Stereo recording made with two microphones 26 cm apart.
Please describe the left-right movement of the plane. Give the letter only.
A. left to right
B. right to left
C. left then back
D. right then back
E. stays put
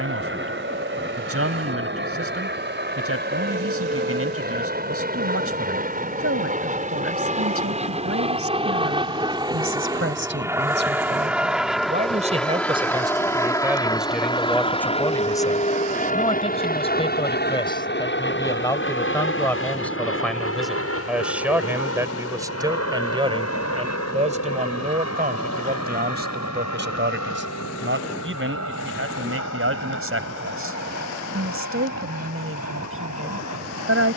B.